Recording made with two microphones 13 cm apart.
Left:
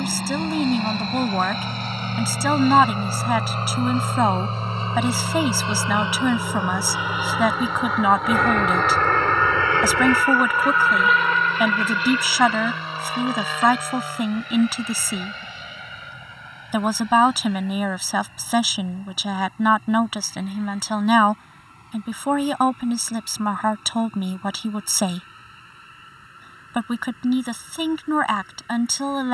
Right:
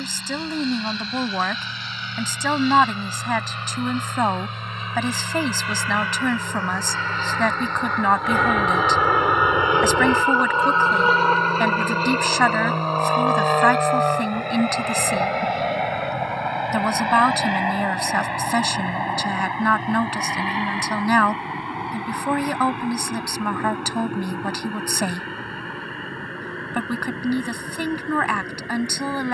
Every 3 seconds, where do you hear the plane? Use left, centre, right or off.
left, left, centre, right, right, right, right, right, right, right.